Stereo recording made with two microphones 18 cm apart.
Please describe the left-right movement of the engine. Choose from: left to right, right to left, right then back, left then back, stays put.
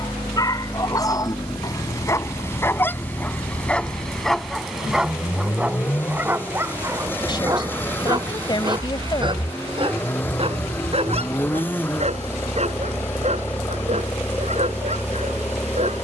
stays put.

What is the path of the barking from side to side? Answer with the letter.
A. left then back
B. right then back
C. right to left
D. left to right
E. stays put
D.